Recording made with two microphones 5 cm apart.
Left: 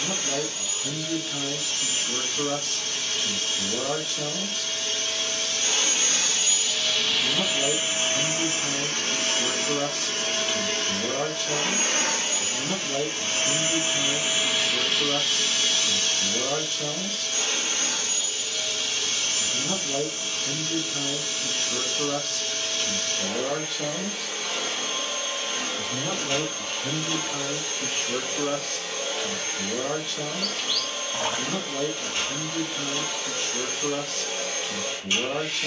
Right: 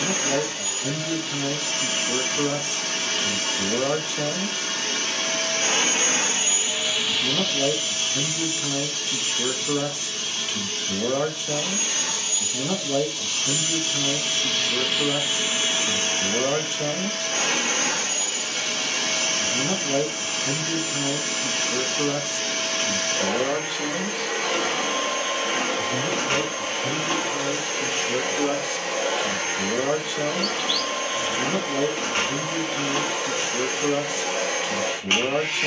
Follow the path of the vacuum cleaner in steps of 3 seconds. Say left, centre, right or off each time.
right, right, centre, left, left, right, right, right, right, right, right, right.